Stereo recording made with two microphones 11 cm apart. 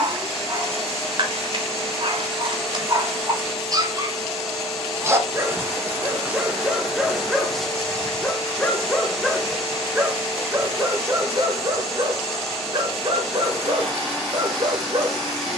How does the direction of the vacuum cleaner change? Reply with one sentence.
You can hear the vacuum cleaner stay in one place.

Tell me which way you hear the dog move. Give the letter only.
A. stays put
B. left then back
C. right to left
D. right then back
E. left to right
B.